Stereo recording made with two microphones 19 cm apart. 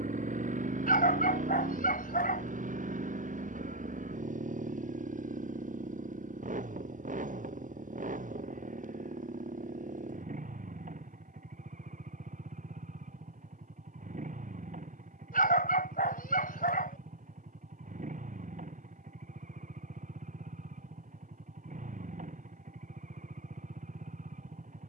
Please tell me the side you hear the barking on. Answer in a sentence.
In this clip you hear the barking on the left.